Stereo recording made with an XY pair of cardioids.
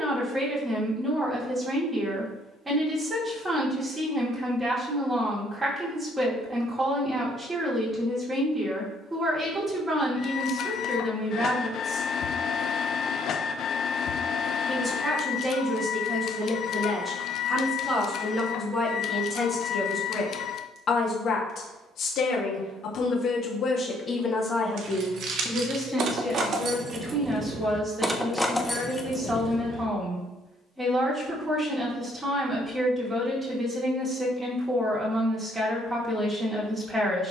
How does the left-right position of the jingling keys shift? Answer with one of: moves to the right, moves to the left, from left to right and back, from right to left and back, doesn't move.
moves to the left.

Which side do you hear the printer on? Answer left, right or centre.
left.